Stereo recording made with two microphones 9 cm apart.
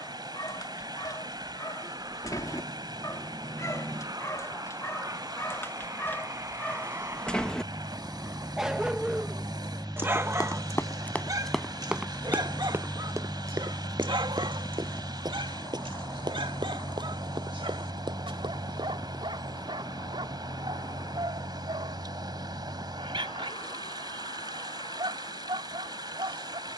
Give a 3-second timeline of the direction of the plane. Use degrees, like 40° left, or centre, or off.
50° right, 40° right, 30° right, 10° right, 20° left, 40° left, 50° left, 60° left, 70° left.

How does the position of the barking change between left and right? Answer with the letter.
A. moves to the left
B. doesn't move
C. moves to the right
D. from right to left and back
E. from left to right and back
C.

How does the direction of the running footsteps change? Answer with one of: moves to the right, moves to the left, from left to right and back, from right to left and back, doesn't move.
moves to the right.